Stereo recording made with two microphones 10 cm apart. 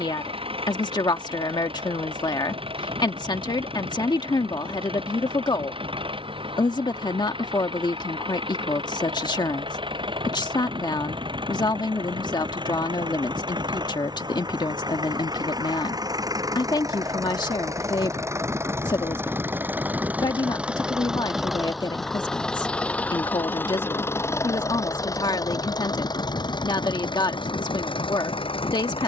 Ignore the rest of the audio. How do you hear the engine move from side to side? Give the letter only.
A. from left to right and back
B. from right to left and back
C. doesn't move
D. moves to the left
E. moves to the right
D.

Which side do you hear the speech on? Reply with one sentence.
In this clip you hear the speech on the left.